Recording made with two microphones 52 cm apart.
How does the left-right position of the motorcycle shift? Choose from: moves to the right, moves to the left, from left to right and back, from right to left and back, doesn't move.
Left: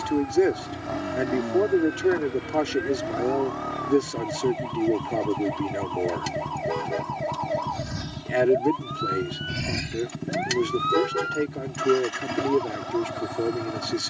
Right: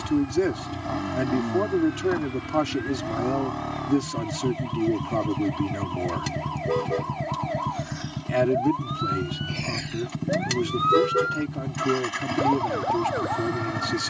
doesn't move.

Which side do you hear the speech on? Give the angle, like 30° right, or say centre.
30° right.